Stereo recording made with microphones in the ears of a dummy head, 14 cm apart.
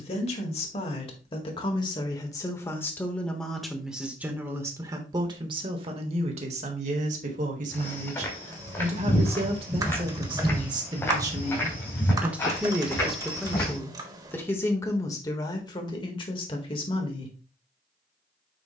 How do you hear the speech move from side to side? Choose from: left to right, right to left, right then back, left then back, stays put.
right then back.